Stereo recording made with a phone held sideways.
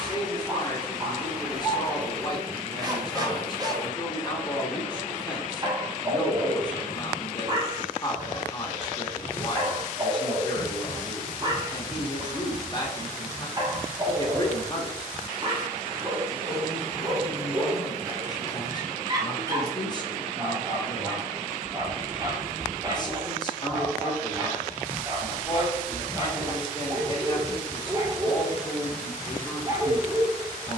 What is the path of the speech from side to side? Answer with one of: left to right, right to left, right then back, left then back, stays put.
stays put.